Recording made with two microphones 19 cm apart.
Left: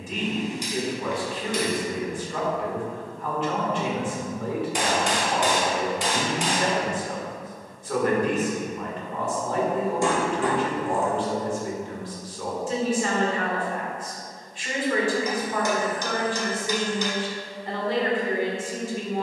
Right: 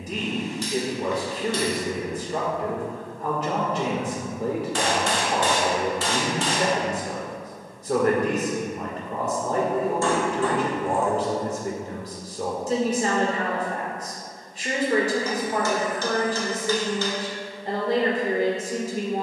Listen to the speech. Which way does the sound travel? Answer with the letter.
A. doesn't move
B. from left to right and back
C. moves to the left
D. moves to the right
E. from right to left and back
A.